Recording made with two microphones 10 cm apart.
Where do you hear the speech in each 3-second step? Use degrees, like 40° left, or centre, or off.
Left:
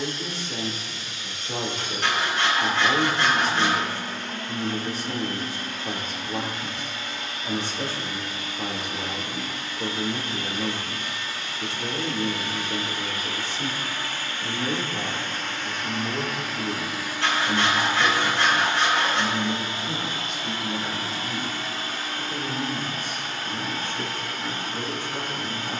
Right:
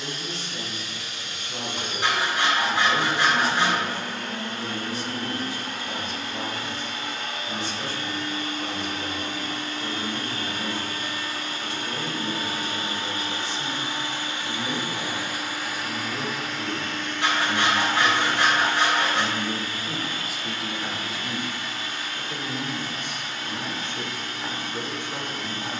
50° left, 50° left, 50° left, 50° left, 50° left, 30° left, centre, 20° right, 20° right.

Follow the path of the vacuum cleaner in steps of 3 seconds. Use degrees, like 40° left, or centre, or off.
80° right, 70° right, 60° right, 50° right, 30° right, centre, 30° left, 40° left, 50° left.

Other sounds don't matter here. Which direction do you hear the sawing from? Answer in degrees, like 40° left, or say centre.
20° right.